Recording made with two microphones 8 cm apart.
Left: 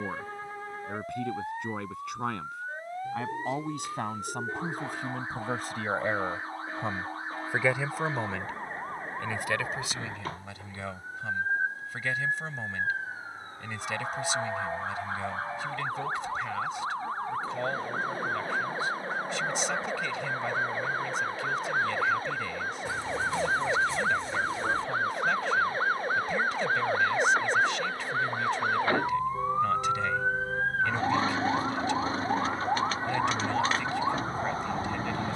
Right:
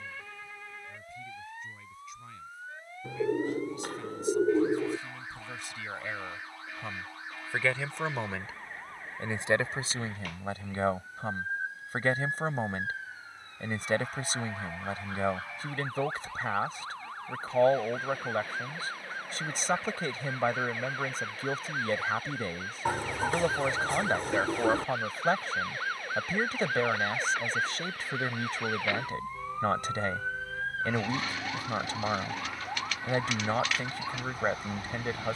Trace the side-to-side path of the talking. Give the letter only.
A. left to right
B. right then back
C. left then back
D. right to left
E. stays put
A.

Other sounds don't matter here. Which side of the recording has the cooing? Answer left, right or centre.
right.